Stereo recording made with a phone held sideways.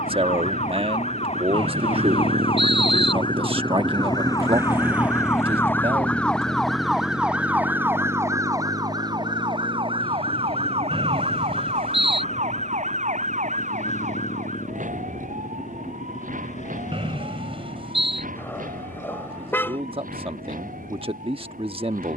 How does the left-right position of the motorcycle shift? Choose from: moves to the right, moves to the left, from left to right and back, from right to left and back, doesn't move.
moves to the left.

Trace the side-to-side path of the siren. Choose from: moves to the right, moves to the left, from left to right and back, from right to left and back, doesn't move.
moves to the right.